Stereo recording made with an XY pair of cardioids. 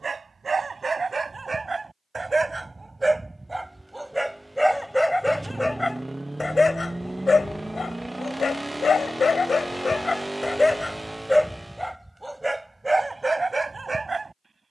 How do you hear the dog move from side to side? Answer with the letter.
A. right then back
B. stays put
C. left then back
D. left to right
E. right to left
C.